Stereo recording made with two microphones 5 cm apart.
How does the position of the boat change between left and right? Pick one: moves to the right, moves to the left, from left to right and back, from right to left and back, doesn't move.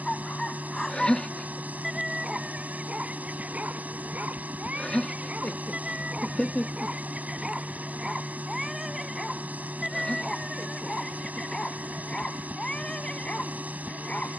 doesn't move.